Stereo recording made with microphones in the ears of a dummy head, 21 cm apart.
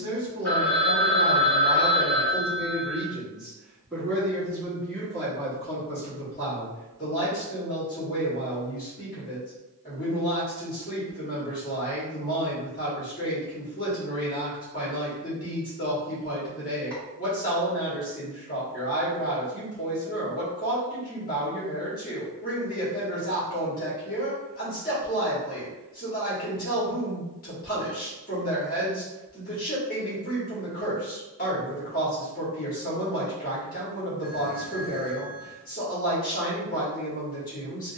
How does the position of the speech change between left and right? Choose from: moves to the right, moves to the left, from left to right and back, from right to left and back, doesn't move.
moves to the left.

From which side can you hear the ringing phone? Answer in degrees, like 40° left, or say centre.
10° left.